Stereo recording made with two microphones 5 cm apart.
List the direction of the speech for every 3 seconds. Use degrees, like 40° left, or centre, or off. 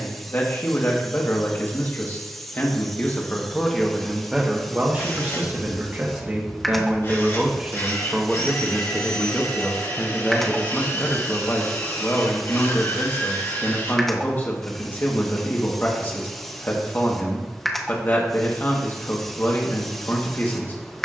40° left, 10° right, 20° right, 20° left, 40° left, 40° left, 40° left.